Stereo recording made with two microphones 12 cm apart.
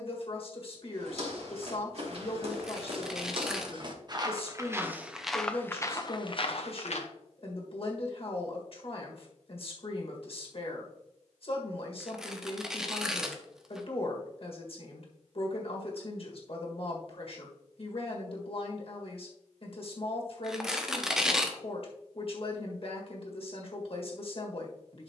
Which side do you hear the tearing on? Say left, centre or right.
centre.